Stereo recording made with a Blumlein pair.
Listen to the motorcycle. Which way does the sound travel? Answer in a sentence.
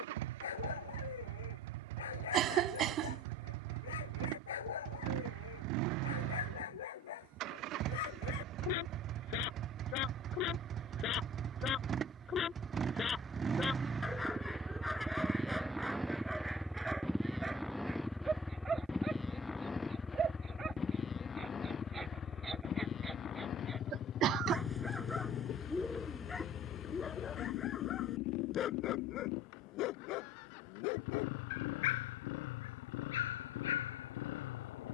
In this clip you hear the motorcycle travel towards the left.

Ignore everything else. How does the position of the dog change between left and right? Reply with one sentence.
You can hear the dog move from left to right and back again.